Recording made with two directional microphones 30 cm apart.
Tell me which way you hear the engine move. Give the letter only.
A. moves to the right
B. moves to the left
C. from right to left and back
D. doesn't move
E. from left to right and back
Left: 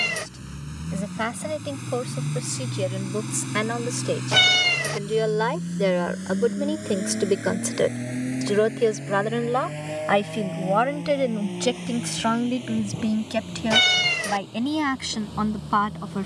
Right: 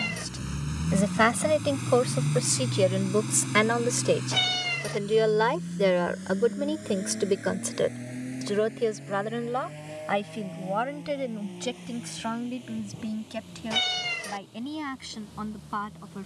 B.